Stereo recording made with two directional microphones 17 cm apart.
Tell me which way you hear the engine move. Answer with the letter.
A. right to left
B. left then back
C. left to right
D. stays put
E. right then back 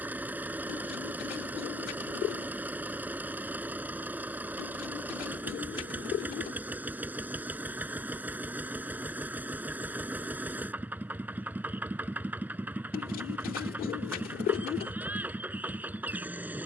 D.